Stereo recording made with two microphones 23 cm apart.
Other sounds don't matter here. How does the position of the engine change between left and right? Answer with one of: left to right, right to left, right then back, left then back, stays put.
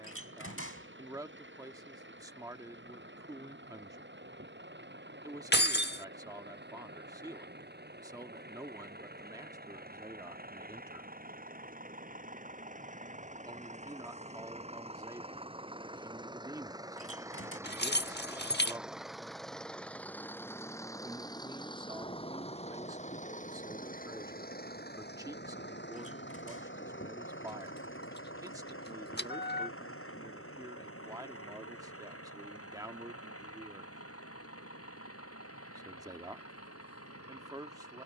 right to left.